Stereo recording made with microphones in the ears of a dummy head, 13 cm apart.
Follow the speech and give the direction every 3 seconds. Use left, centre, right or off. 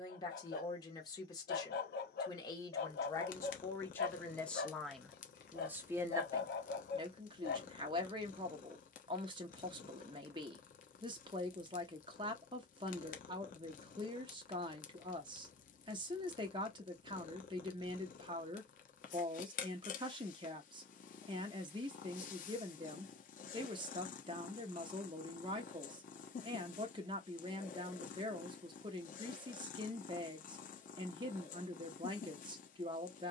left, centre, right, right, right, right, right, right, right, right, right.